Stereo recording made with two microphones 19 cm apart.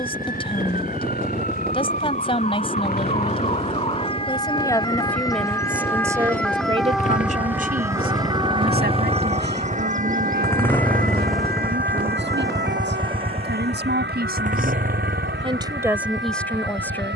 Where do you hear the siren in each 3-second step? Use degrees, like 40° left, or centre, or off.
40° left, 30° left, 10° right, 50° right, 70° right, 80° right.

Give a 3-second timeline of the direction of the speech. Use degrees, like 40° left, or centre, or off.
30° left, 10° left, 40° right, 70° right, 70° right, centre.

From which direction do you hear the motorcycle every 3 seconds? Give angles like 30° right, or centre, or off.
70° left, 60° left, 40° left, 10° left, 30° right, 60° right.